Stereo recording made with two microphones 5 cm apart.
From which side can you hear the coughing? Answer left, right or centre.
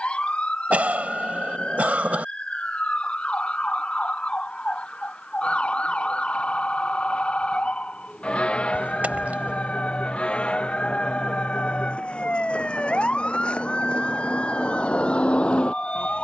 right.